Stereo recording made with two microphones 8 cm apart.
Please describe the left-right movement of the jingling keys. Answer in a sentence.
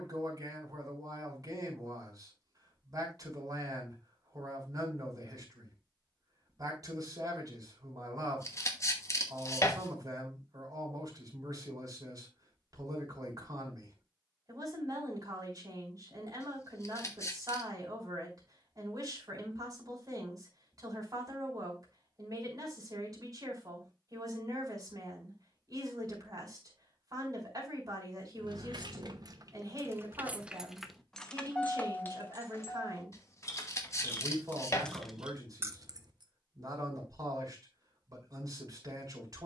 In this clip you hear the jingling keys go left and come back.